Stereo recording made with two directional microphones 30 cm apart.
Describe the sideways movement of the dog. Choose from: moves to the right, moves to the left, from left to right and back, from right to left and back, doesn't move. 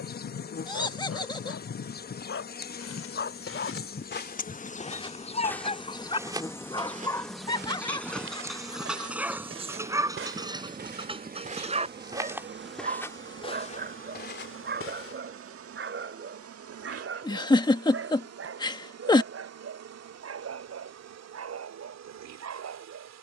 moves to the right.